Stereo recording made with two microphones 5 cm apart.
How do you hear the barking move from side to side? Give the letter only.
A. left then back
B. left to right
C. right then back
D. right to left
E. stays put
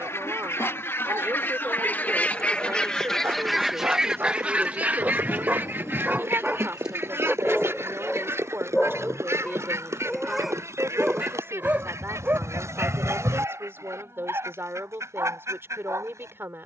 A.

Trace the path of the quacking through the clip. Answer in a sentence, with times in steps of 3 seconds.
In this clip you hear the quacking on the left from 0 s and on the right from 3 s.